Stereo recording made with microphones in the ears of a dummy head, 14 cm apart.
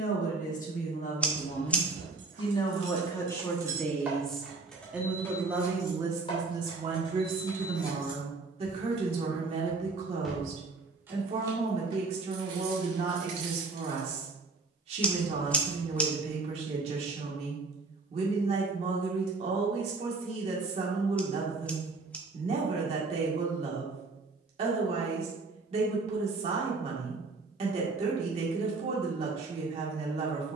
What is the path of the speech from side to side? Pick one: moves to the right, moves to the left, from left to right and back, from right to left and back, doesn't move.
moves to the right.